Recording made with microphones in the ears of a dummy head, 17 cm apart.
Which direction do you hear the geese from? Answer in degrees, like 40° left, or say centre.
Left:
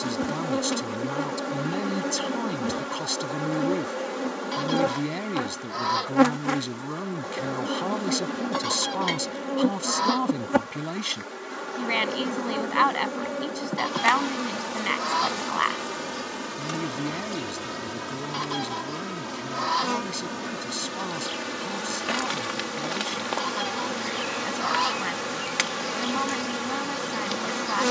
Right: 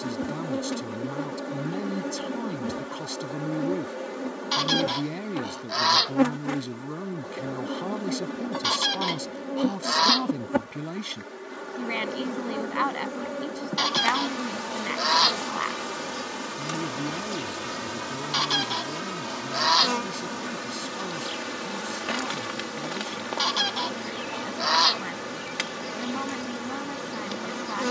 60° right.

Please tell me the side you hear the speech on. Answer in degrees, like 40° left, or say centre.
20° left.